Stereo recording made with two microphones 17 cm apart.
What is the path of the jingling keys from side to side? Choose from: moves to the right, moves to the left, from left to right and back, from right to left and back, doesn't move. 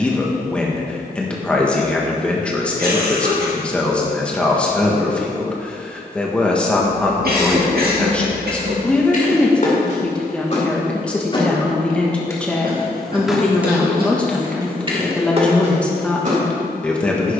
moves to the right.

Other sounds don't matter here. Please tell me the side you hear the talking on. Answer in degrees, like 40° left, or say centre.
10° left.